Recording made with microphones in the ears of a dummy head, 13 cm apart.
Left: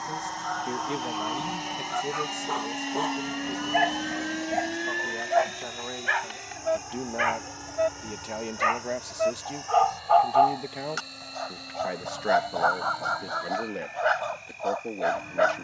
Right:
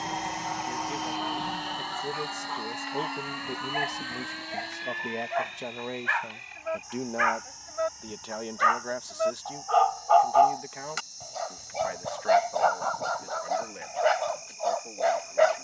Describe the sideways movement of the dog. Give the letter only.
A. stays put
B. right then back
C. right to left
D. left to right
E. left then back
D.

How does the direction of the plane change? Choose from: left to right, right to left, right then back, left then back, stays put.
right to left.